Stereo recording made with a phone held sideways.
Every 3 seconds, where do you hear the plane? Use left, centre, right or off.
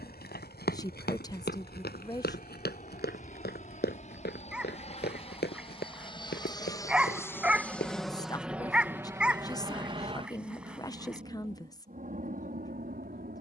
left, left, centre, right, right.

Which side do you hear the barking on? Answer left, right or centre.
centre.